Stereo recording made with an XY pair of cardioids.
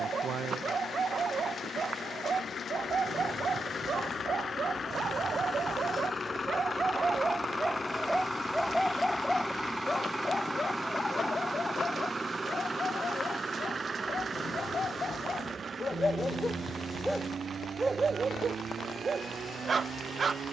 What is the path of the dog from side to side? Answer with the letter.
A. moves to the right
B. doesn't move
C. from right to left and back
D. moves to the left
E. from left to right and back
C.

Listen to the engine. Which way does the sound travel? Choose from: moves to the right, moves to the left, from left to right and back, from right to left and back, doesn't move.
moves to the right.